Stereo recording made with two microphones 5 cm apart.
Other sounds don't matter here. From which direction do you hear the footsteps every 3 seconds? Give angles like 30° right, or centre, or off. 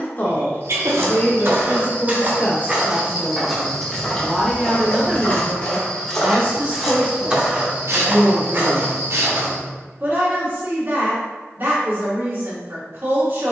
40° right, 20° left, 20° right, 50° right, off.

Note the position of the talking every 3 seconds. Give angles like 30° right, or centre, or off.
40° left, centre, 40° right, 40° right, 40° right.